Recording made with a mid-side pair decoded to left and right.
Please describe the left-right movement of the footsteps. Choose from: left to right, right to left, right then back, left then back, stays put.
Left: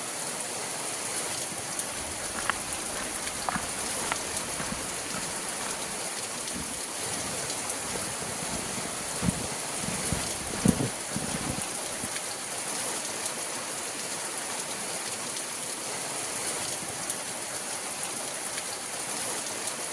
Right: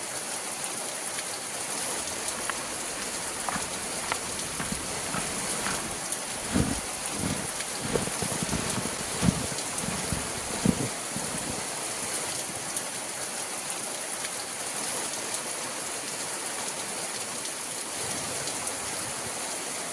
right then back.